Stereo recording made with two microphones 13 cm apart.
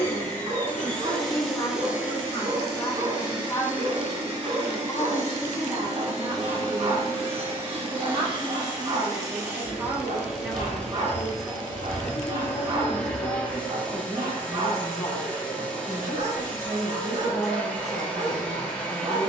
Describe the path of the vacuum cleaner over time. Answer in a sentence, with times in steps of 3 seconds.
In this clip you hear the vacuum cleaner in the centre from 0 s, on the right from 3 s and in the centre from 9 s.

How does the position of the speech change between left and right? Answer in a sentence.
In this clip you hear the speech go right and come back.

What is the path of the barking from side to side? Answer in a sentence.
You can hear the barking stay in one place.